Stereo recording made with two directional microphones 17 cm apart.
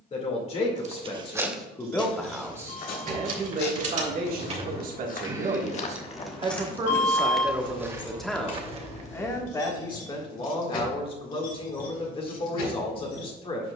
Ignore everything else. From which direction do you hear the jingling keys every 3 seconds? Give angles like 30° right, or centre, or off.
60° right, 40° right, 20° left, 60° left, 70° left.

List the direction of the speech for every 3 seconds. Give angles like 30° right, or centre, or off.
20° left, 50° right, 10° right, 30° left, 30° left.